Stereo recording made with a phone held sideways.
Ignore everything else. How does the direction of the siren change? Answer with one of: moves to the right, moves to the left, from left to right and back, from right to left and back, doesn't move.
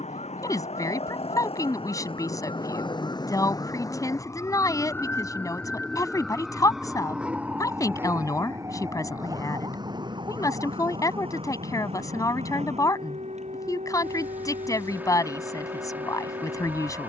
moves to the right.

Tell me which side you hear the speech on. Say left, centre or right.
left.